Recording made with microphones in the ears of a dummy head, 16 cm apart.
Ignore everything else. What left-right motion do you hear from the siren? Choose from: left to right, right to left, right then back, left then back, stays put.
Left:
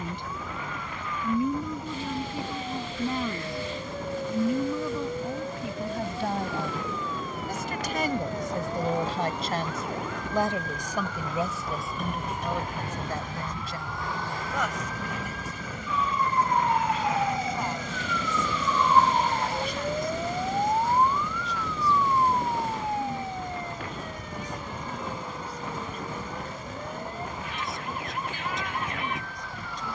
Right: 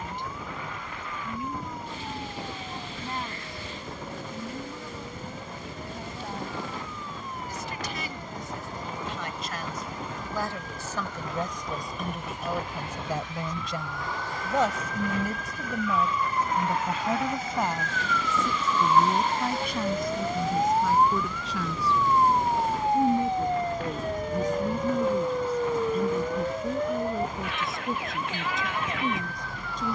left to right.